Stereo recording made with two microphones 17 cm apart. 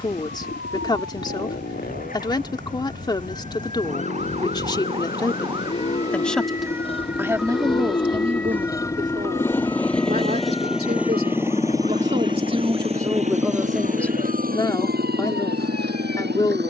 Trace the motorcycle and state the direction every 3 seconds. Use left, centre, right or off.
left, left, left, centre, right, right.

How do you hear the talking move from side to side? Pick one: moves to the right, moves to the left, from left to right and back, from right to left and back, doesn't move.
from left to right and back.